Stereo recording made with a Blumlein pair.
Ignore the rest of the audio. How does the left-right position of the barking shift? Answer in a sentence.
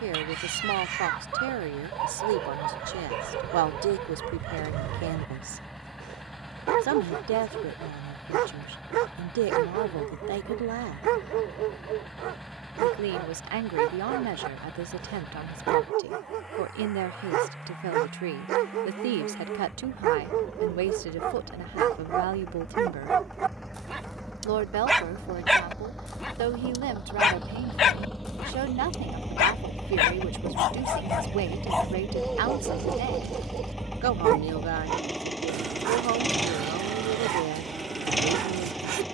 You can hear the barking move from right to left and back again.